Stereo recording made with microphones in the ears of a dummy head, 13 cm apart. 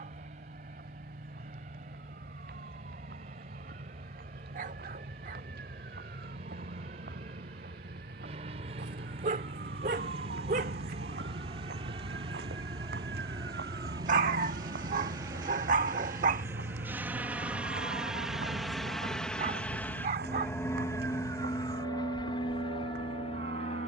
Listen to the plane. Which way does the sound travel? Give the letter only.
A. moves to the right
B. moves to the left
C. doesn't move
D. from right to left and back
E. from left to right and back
B.